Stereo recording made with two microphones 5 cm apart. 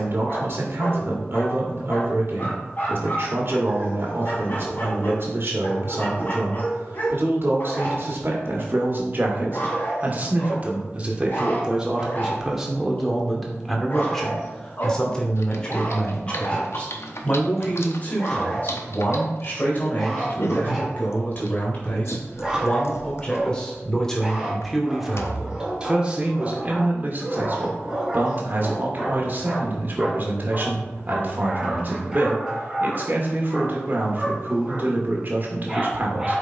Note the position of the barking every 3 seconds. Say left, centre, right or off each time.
left, left, left, left, left, left, centre, centre, centre, centre, centre, centre.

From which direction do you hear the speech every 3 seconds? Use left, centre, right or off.
right, right, right, right, centre, left, left, left, centre, right, right, right.